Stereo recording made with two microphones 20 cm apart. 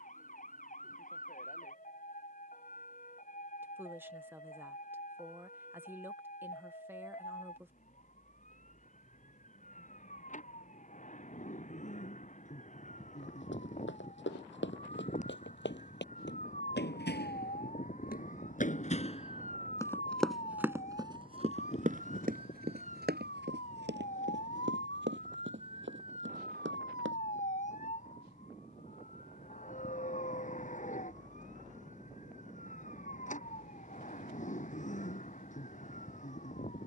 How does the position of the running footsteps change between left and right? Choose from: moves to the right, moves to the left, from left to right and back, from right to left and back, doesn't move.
moves to the right.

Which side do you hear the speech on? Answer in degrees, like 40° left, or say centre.
10° right.